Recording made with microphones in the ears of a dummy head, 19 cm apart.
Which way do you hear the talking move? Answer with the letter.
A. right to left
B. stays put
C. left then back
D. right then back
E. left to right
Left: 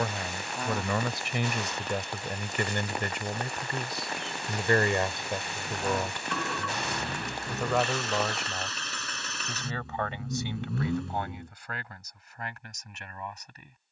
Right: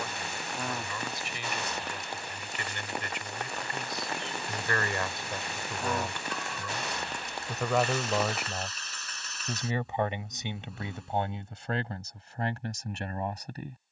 E.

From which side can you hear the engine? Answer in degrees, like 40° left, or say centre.
60° left.